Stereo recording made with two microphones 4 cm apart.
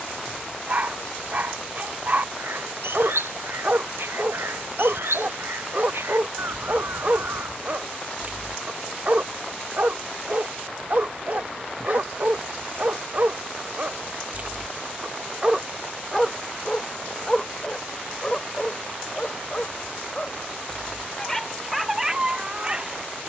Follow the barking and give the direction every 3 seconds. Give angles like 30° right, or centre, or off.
40° right, 40° right, 40° right, 40° right, 40° right, centre, 30° left, 10° right.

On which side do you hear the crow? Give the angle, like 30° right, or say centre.
80° right.